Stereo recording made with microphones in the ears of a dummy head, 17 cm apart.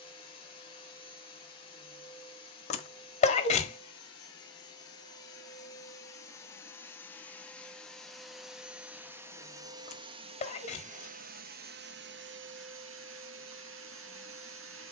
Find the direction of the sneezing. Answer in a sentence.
You can hear the sneezing on the left.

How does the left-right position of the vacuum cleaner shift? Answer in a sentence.
In this clip you hear the vacuum cleaner go from the left side to the right.